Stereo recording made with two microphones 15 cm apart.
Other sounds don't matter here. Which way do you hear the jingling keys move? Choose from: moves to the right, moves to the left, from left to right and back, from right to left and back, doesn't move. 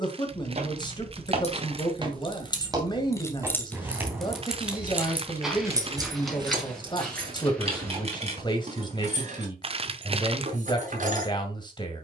moves to the right.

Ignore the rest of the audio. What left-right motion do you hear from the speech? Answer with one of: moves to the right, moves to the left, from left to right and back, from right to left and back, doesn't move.
doesn't move.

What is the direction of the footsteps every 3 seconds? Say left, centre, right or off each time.
right, centre, centre, off.